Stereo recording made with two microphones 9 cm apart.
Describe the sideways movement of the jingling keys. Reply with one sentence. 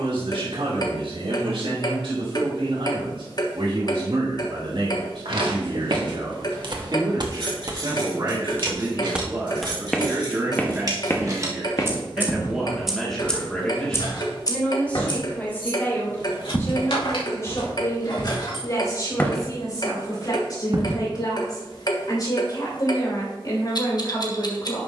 You can hear the jingling keys go from the right side to the left.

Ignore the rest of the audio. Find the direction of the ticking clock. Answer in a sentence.
You can hear the ticking clock on the left.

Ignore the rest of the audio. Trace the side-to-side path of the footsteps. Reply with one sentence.
In this clip you hear the footsteps go left and come back.